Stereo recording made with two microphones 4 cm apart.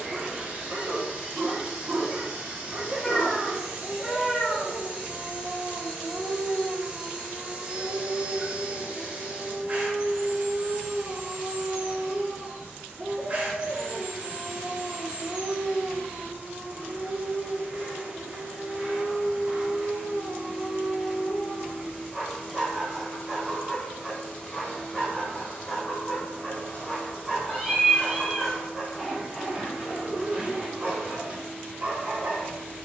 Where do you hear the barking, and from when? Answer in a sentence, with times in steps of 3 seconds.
In this clip you hear the barking on the right from 0 s, in the centre from 21 s and on the right from 30 s.